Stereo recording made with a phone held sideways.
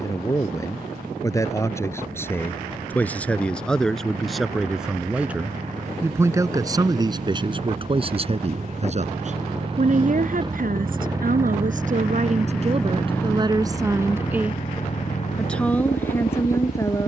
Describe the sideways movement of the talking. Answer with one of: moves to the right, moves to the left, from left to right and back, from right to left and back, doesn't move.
from left to right and back.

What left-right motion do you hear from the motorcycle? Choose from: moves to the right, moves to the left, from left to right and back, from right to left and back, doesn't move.
moves to the left.